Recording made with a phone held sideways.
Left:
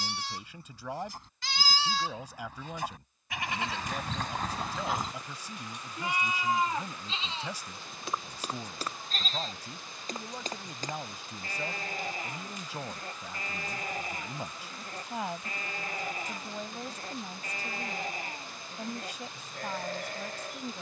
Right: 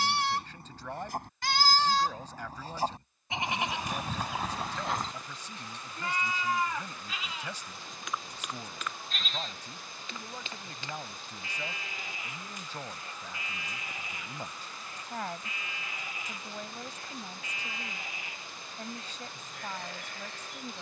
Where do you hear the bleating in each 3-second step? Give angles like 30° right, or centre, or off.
50° right, 10° right, 30° left, 40° left, 40° left, 40° left, 40° left.